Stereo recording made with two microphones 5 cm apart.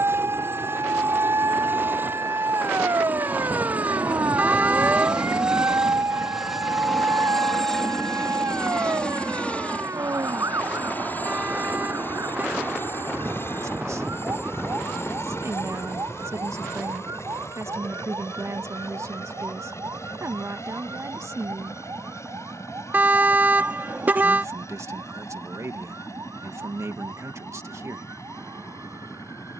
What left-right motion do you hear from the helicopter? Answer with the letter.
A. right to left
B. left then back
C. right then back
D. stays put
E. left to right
A.